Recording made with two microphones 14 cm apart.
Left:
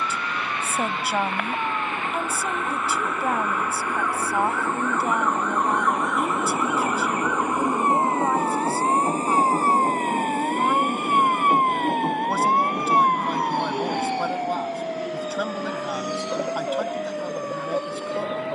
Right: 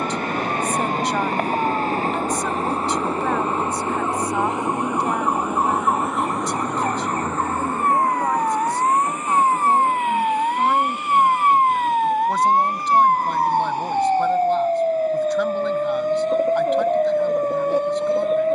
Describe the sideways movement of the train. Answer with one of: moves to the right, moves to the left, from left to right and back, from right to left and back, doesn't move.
moves to the left.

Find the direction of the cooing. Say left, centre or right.
centre.